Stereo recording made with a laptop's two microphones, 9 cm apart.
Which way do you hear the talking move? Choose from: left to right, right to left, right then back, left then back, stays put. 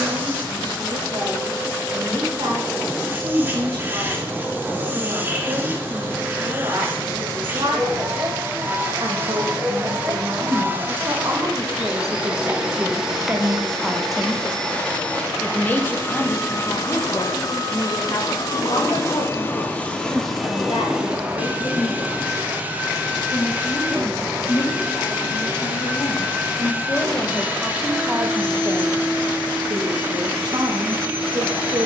left then back.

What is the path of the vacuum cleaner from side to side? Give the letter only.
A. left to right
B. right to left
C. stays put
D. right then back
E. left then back
E.